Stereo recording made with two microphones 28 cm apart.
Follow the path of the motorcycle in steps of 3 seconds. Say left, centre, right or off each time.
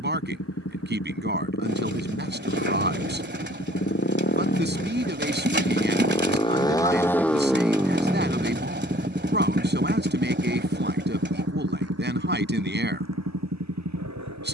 left, left, centre, right, right.